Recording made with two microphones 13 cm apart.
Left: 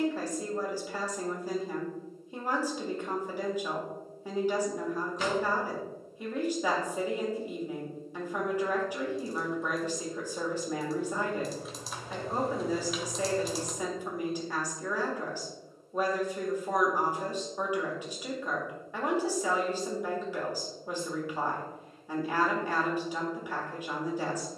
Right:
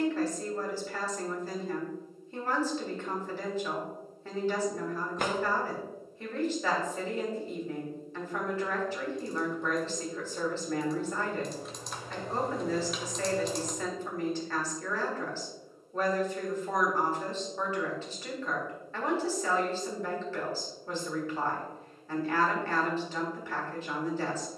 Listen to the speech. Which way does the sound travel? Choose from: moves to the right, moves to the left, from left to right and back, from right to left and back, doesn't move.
doesn't move.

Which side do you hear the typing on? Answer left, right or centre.
centre.